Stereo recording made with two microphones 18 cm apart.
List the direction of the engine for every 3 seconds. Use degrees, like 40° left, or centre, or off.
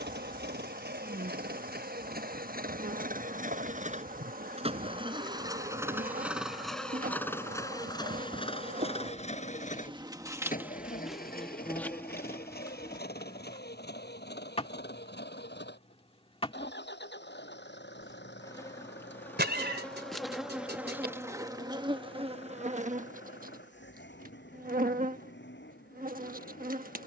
60° right, 30° right, 10° left, 50° left, 60° left, 70° left, 70° left, 70° left, 80° left.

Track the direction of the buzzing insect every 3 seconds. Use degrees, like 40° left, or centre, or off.
50° right, 50° right, 50° right, 10° right, 20° left, 30° left, 10° left, 30° right, 50° right.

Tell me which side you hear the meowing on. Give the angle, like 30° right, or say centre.
60° right.